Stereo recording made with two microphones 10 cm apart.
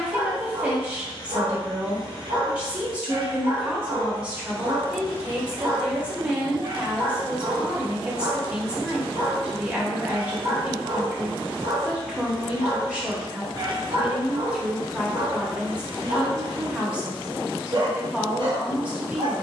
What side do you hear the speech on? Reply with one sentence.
You can hear the speech in the centre.